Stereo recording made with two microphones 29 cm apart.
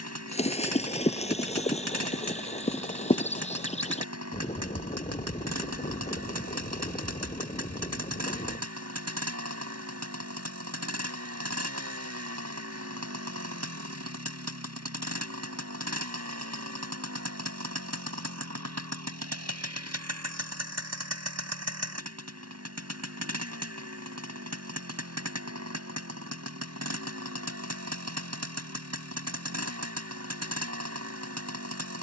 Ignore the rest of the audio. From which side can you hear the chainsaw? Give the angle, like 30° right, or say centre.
60° right.